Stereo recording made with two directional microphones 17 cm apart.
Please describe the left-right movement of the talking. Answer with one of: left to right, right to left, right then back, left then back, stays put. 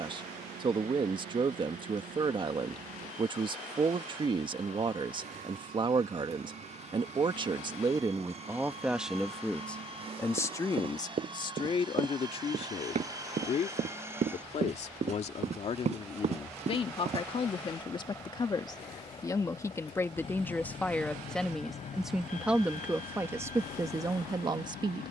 left then back.